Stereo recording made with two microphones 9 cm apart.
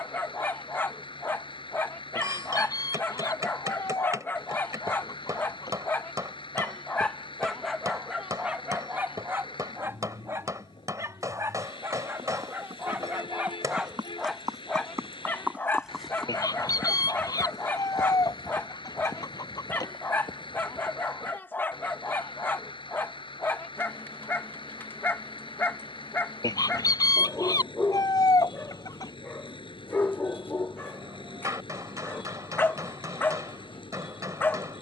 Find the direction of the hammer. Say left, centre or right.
right.